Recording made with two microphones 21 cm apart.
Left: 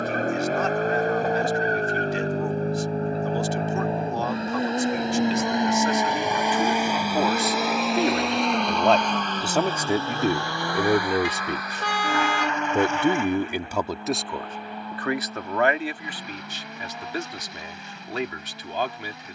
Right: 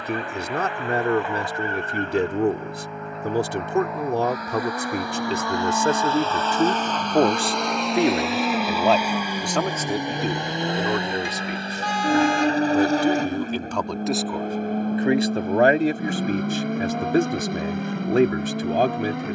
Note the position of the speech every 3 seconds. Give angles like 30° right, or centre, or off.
60° right, 60° right, 30° right, 20° left, 10° left, 50° right, 50° right.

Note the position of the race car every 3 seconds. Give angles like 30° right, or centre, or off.
40° left, 30° left, centre, 20° right, 40° right, 50° right, 60° right.